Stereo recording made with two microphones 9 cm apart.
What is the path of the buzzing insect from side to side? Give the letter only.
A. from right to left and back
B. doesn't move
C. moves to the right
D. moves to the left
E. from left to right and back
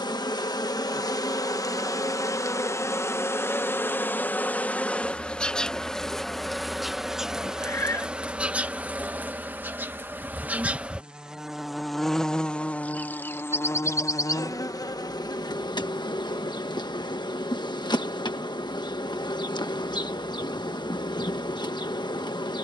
E.